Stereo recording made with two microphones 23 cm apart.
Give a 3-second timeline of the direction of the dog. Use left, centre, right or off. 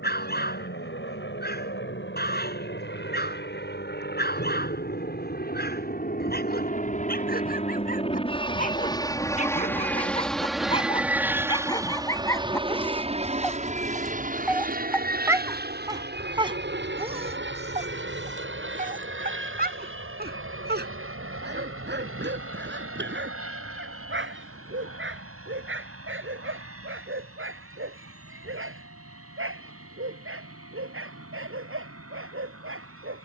left, left, left, left, centre, right, right, right, right, right, right.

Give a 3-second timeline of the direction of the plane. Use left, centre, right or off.
left, left, left, centre, right, right, right, right, right, right, right.